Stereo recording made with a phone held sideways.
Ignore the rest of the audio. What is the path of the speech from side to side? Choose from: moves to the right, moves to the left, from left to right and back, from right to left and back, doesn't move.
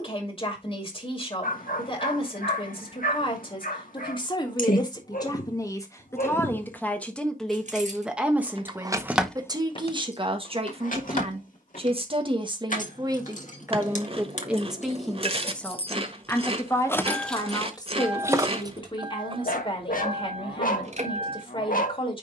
from left to right and back.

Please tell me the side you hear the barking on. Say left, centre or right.
left.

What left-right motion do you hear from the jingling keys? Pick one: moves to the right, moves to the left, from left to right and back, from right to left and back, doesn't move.
from right to left and back.